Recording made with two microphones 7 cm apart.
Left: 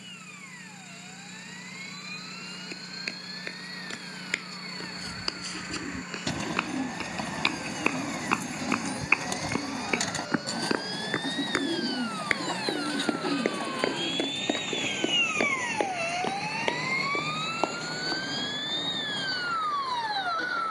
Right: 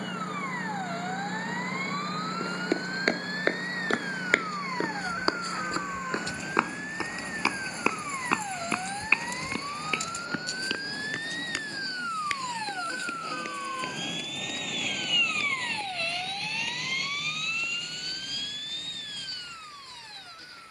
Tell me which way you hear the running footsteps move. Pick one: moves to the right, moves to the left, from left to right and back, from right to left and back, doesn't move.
moves to the left.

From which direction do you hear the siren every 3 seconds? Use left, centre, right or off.
right, right, right, right, centre, left, left.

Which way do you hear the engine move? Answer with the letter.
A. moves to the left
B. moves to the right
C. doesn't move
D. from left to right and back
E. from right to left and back
A.